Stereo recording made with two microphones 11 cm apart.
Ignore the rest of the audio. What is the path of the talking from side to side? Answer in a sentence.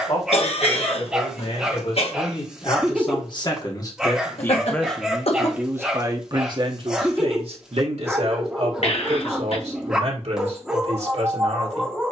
You can hear the talking go from the left side to the right.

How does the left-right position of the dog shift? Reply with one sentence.
You can hear the dog stay put.